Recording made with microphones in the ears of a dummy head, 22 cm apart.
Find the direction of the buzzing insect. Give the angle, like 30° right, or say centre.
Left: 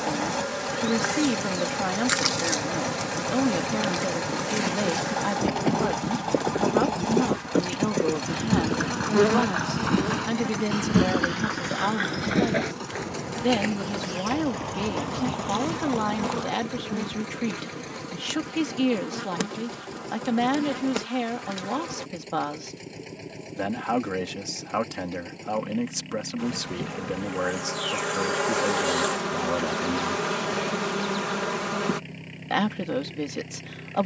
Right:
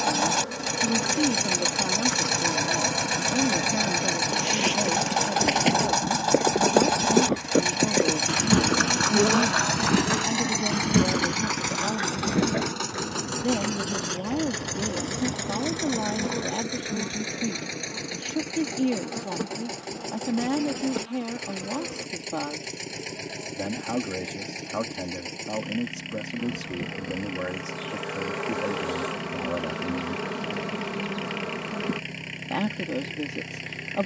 70° left.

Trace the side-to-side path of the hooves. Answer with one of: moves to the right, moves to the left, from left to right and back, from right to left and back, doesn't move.
moves to the left.